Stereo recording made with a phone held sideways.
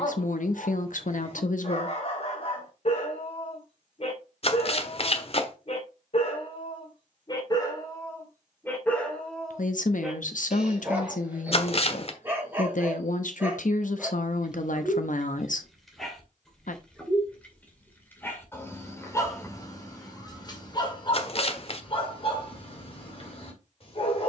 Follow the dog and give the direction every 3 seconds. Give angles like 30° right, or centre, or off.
50° left, 50° left, 30° left, centre, 10° right, centre, 20° left, 40° left.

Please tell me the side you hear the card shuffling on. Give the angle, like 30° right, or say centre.
50° left.